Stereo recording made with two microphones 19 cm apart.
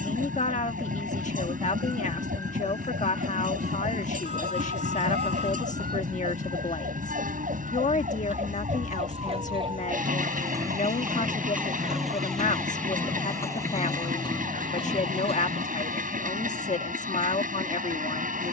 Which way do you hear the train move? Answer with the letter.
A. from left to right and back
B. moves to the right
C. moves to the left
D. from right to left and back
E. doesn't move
E.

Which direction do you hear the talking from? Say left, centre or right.
left.